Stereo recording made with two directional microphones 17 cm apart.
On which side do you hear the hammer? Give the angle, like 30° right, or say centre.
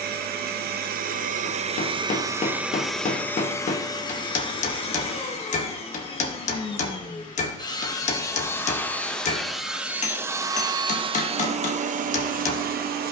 50° left.